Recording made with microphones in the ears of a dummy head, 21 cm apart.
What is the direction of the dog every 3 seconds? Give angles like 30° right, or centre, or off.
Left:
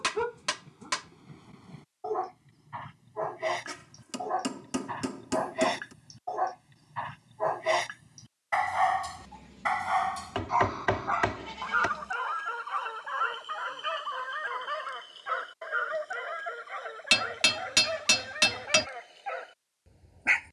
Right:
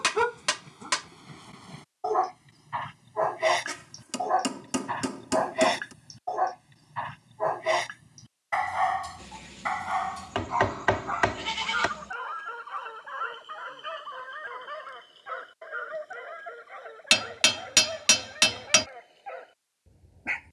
50° right, 30° right, centre, 20° left, 40° left, 40° left, 50° left.